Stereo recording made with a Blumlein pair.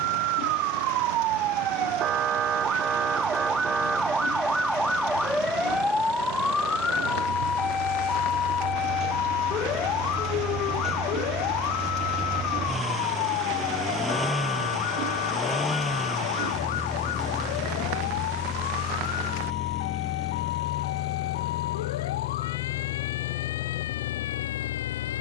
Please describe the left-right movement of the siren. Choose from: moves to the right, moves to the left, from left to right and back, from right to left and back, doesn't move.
moves to the left.